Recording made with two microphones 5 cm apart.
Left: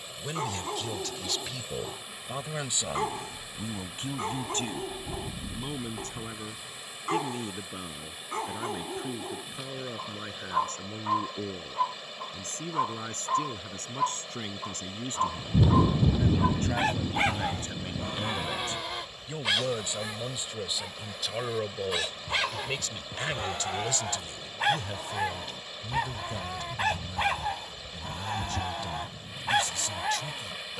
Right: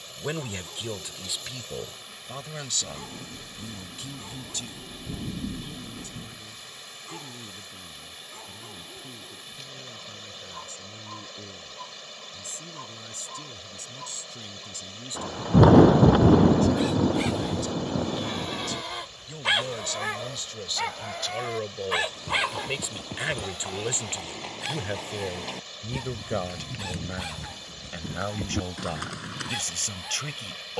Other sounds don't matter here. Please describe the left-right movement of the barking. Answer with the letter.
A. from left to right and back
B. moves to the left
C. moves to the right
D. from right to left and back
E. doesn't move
A.